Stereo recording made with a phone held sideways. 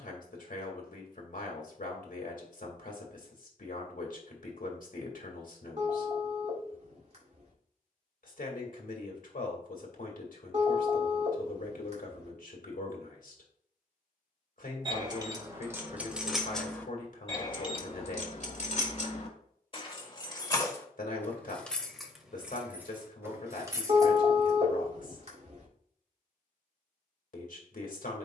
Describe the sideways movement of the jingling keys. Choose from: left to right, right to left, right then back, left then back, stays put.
left then back.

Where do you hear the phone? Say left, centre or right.
right.